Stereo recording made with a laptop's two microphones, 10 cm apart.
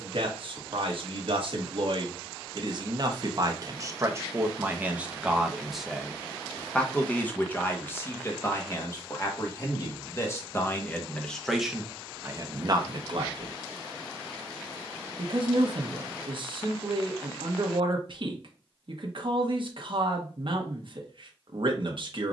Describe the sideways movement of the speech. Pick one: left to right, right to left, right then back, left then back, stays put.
left then back.